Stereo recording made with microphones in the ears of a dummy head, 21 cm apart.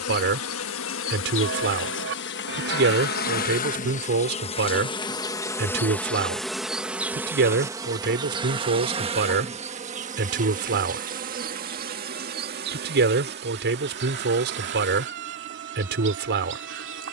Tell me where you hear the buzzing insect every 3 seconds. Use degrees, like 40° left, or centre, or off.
60° left, 30° left, 10° right, 30° right, 50° right, 50° right.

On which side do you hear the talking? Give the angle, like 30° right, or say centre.
50° right.